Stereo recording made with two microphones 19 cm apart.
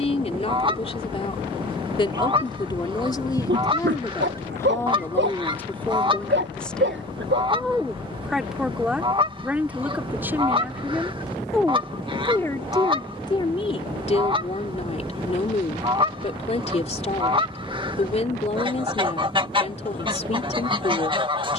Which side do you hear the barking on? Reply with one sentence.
You can hear the barking on the right.